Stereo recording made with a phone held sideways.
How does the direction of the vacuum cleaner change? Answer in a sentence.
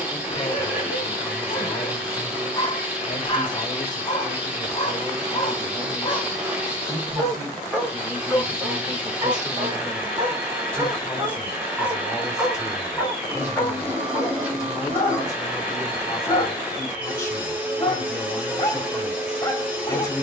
You can hear the vacuum cleaner stay in one place.